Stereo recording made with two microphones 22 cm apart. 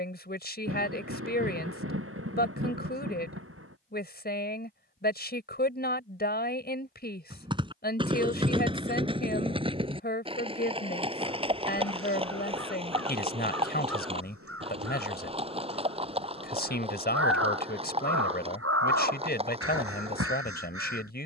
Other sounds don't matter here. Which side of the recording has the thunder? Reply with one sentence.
In this clip you hear the thunder on the right.